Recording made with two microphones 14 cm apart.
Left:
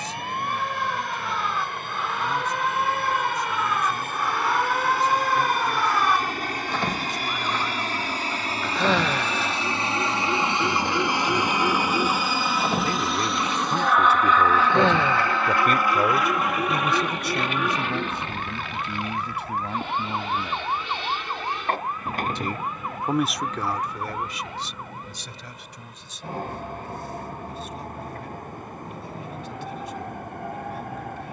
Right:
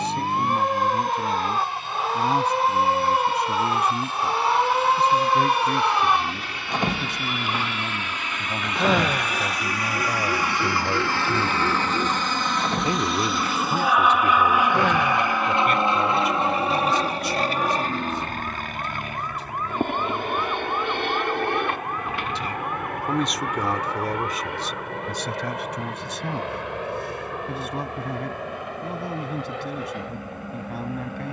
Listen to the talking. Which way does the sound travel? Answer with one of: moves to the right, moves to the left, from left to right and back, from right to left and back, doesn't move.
from right to left and back.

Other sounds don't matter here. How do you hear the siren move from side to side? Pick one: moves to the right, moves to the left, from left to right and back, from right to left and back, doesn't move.
moves to the left.